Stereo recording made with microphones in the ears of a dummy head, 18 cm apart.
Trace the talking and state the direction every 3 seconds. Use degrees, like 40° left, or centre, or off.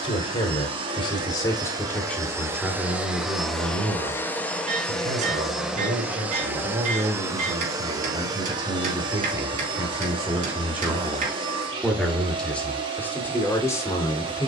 10° left, 30° right, 30° right, 10° right, 10° left.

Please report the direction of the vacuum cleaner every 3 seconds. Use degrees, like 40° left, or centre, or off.
20° right, centre, 20° right, 30° right, 30° right.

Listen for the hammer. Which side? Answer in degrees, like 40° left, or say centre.
40° right.